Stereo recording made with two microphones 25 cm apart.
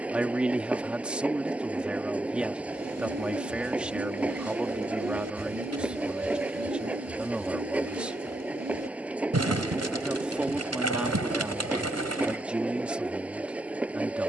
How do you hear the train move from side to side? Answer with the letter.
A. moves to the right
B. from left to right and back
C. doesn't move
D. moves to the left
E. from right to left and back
C.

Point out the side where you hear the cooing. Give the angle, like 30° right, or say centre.
80° right.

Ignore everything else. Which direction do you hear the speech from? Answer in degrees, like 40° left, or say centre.
centre.